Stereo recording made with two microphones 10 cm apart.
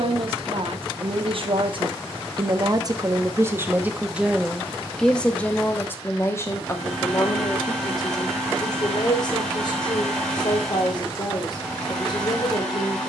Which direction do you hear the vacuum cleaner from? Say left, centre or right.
centre.